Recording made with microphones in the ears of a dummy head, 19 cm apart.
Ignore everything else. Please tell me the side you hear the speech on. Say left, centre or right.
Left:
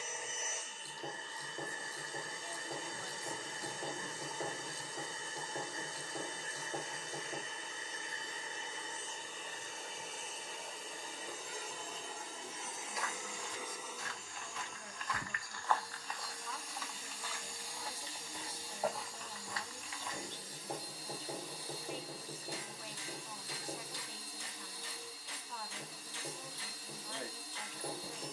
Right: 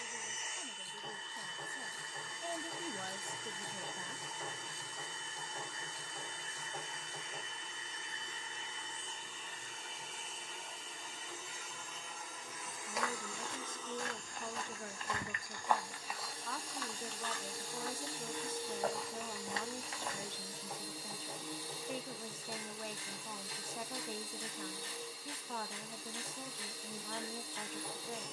right.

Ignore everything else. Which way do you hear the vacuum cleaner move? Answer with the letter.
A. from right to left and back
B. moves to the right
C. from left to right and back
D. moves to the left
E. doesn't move
B.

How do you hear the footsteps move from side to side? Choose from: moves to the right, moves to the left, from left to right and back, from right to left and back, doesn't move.
from right to left and back.